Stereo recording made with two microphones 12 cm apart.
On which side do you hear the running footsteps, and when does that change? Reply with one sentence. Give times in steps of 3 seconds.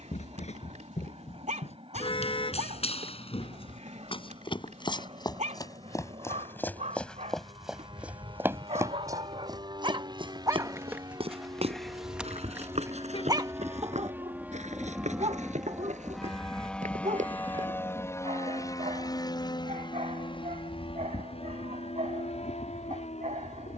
In this clip you hear the running footsteps on the left from 0 s, in the centre from 6 s, on the right from 9 s and not at all from 18 s.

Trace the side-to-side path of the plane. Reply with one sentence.
In this clip you hear the plane move to the left.